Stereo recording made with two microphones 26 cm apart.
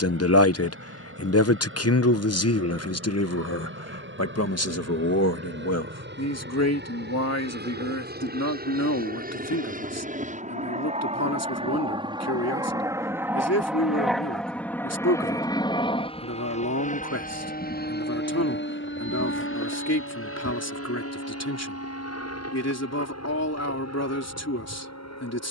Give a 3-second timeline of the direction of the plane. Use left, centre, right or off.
right, right, right, right, centre, left, left, left, left.